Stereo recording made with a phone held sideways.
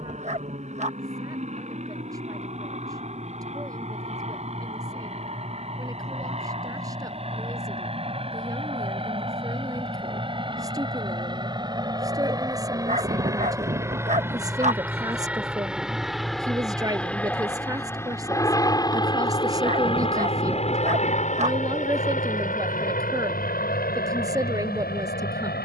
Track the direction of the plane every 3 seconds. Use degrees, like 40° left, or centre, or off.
50° right, 50° right, 40° right, 30° right, 20° right, centre, 30° left, 50° left, 70° left.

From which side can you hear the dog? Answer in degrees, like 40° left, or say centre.
50° right.